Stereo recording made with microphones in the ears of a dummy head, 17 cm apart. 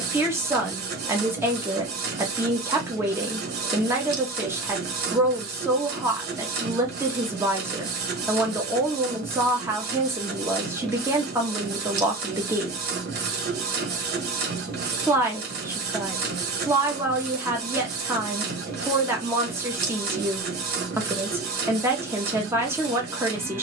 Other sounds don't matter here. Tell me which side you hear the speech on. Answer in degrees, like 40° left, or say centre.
10° right.